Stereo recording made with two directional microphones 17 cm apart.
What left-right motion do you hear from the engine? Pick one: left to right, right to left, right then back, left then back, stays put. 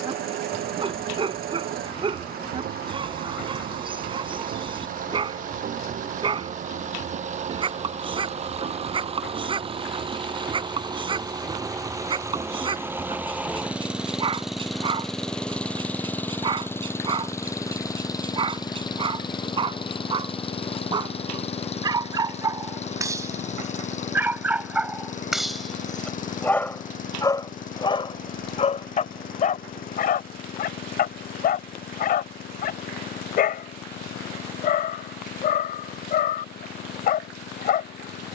right to left.